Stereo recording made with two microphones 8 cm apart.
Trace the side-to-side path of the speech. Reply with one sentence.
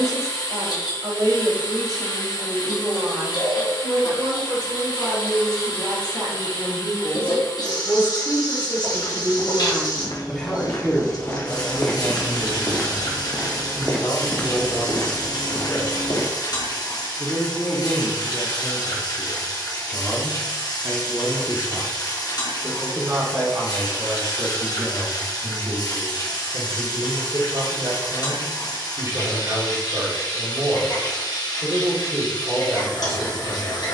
In this clip you hear the speech go left and come back.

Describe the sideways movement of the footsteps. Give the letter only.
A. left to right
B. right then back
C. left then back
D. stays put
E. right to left
B.